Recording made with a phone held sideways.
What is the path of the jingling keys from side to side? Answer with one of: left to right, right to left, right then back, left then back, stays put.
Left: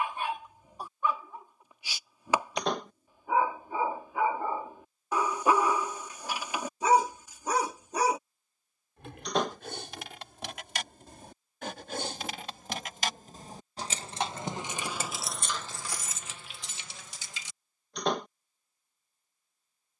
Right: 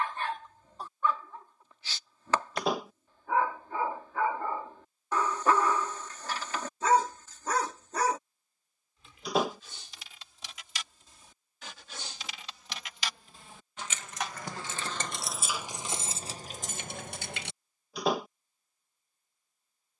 left to right.